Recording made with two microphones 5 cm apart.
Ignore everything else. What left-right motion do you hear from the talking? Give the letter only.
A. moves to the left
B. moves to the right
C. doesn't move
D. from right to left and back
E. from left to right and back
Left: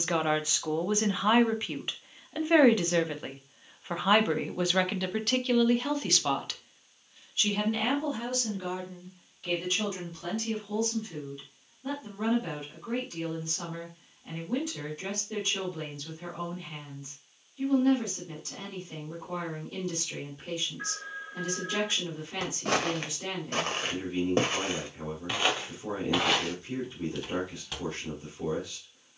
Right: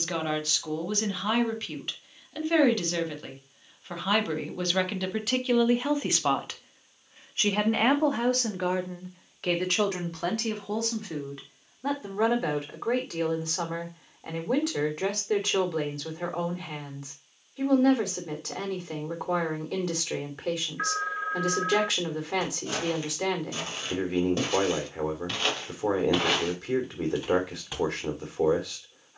B.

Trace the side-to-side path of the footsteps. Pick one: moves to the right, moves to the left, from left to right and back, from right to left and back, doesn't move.
moves to the right.